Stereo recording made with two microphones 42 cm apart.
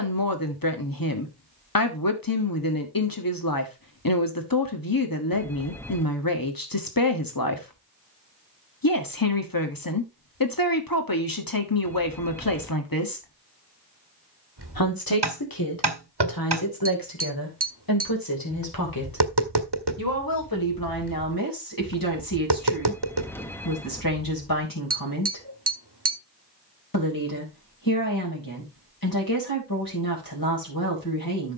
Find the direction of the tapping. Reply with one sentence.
In this clip you hear the tapping on the right.